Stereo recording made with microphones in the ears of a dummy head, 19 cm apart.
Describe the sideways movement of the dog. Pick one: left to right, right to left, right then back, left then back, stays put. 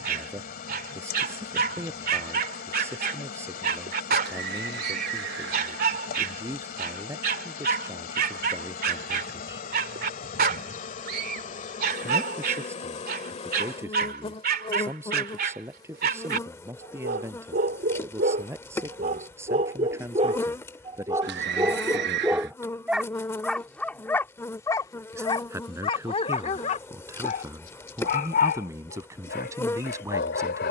right to left.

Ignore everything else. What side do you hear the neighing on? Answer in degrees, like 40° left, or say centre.
60° right.